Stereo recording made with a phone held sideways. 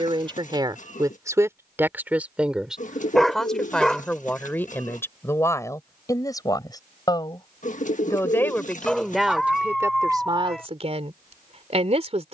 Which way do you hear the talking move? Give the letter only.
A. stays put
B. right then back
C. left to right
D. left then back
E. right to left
D.